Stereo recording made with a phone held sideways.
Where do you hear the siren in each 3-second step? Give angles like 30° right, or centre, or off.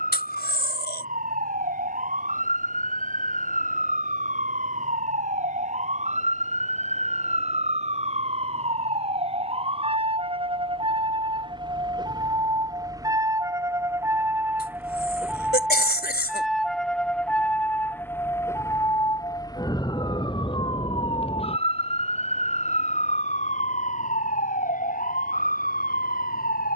50° right, 50° right, 40° right, 30° right, 20° right, centre, 20° left, 40° left, 50° left.